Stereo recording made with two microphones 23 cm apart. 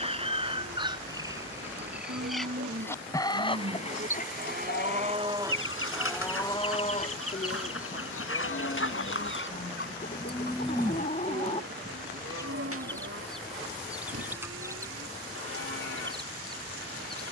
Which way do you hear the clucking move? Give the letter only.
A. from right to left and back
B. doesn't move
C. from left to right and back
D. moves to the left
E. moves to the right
A.